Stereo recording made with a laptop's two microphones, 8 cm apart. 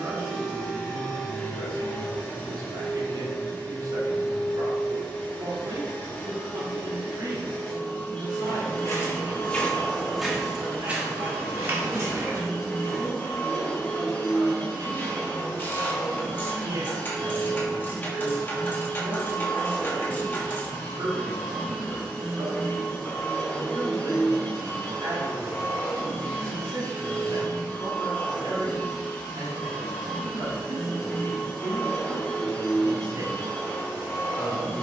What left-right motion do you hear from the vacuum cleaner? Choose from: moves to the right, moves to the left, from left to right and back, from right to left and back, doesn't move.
doesn't move.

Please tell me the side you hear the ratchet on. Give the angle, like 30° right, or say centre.
30° left.